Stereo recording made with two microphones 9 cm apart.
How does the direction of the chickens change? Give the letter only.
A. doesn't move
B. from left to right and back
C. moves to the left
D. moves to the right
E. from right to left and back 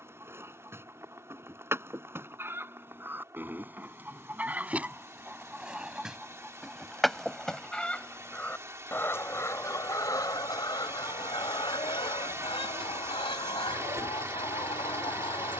C.